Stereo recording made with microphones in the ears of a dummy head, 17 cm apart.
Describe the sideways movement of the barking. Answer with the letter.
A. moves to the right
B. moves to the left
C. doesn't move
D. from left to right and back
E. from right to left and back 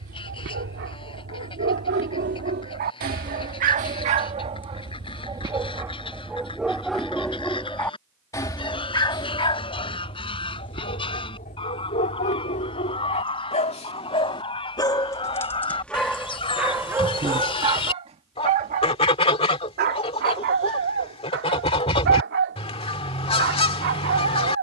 E.